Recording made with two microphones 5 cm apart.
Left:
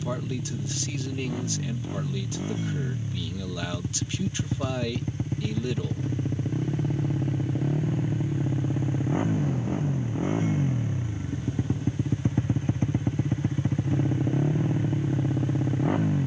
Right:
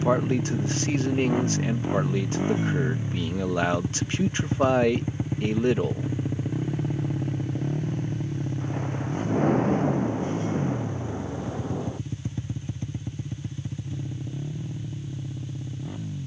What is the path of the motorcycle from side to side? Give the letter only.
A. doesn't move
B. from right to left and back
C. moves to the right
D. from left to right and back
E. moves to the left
E.